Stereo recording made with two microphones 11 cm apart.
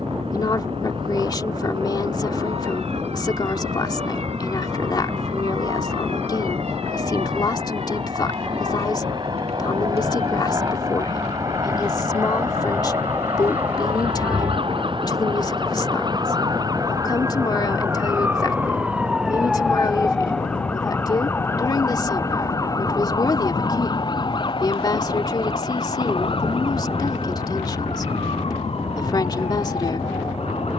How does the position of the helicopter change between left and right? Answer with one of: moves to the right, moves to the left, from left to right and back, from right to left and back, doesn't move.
moves to the left.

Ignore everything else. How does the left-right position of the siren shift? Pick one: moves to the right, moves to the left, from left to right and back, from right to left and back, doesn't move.
moves to the left.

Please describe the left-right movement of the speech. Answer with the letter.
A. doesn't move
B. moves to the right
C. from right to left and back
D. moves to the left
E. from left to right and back
A.